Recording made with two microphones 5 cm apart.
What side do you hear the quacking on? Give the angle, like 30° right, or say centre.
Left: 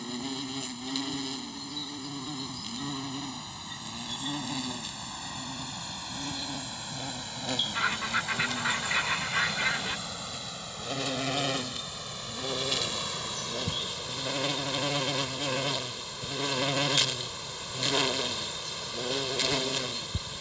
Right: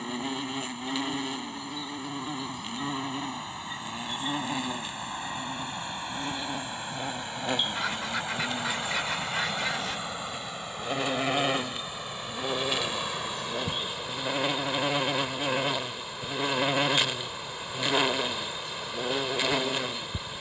20° left.